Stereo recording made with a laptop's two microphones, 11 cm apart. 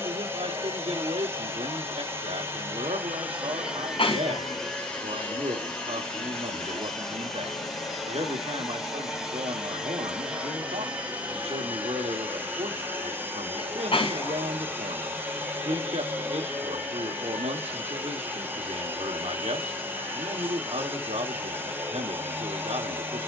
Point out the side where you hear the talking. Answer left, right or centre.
right.